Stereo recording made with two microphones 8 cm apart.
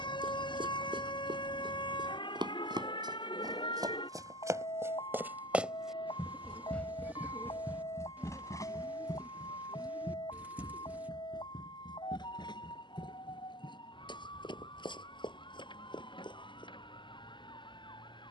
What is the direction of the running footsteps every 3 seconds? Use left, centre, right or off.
right, right, left, left, left, left.